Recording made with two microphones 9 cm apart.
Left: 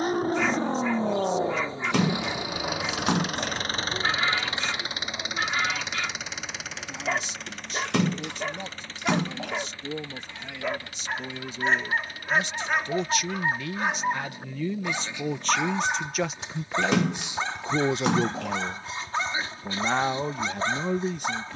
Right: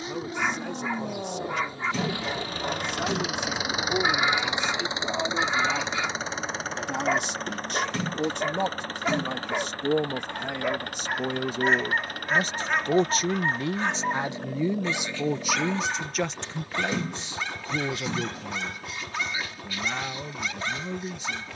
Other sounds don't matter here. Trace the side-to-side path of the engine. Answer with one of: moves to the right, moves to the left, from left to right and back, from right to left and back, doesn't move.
moves to the right.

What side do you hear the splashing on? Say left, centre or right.
left.